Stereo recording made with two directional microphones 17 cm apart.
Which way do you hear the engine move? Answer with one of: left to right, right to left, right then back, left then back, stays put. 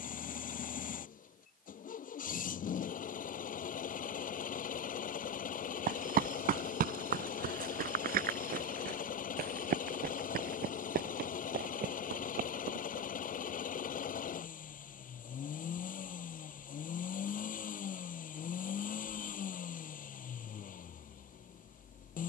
stays put.